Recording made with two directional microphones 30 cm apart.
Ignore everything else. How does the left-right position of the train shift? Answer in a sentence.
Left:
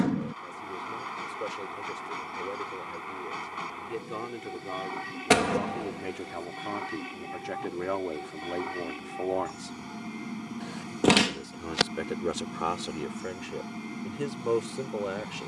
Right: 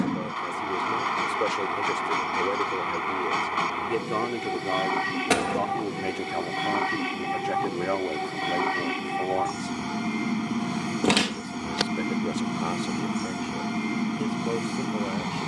In this clip you hear the train stay put.